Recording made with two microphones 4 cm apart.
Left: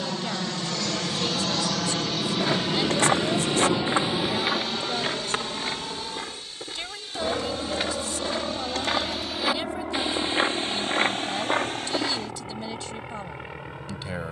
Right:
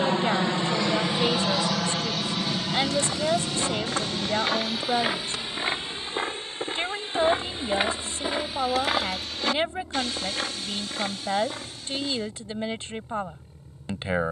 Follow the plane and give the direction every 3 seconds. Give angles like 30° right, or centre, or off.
10° right, 30° left, 50° left, 60° left, 70° left.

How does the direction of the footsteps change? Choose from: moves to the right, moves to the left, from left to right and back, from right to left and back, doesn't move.
from left to right and back.